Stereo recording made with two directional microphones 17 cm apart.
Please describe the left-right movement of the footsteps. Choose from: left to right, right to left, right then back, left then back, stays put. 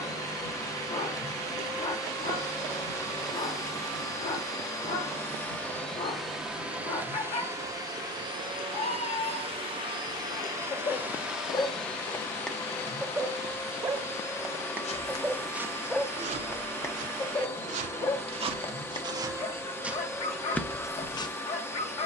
right then back.